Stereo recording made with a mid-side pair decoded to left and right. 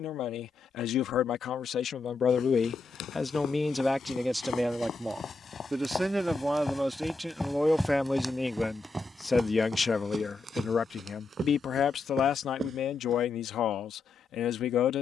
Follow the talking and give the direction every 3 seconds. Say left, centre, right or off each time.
left, centre, centre, left, left.